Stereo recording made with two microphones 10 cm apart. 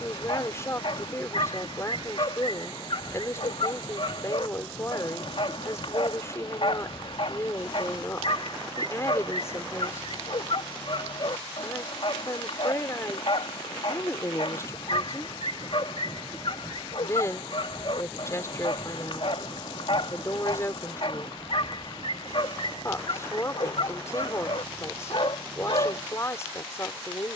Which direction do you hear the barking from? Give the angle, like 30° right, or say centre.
60° left.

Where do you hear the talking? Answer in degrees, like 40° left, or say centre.
30° left.